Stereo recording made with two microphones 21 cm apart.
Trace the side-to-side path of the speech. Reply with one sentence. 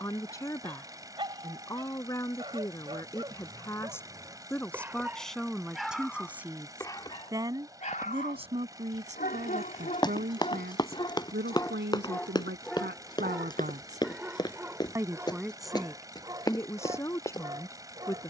You can hear the speech go right and come back.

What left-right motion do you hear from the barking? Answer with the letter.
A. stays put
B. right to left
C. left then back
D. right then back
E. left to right
C.